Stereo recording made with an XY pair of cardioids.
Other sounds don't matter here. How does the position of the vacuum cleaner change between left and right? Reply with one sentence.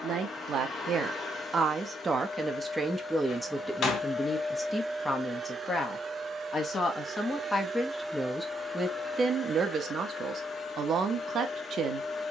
You can hear the vacuum cleaner go right and come back.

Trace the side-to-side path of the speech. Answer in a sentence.
In this clip you hear the speech go left and come back.